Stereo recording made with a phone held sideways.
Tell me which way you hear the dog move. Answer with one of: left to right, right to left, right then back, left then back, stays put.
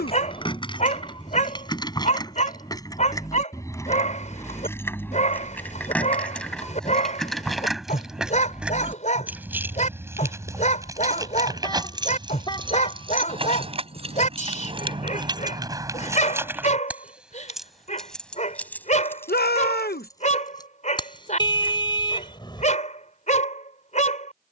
stays put.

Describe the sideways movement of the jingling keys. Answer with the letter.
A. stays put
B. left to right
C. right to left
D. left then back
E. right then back
E.